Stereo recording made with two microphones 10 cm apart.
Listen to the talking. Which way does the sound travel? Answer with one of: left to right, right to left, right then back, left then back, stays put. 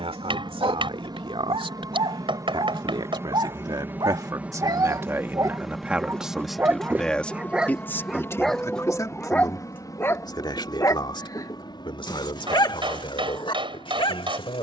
right to left.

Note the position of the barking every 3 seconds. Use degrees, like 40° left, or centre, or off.
60° right, 40° right, 10° right, 20° left, 50° left.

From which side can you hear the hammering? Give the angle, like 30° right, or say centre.
50° right.